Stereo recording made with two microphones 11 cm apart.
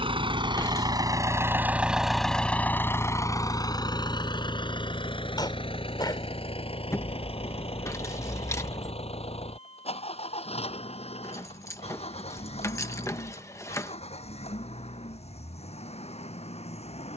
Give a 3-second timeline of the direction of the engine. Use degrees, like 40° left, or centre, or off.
20° right, 40° left, 60° left, 70° left, 70° left, 70° left.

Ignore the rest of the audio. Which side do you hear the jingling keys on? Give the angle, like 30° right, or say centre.
30° left.